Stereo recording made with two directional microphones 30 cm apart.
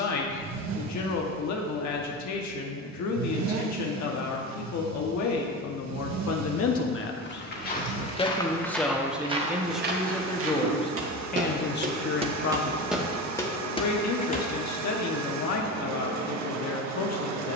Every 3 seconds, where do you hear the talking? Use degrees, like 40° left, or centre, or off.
70° left, 70° left, 30° left, 10° left, 60° left, 60° left.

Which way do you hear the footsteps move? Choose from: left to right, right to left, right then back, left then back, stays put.
right then back.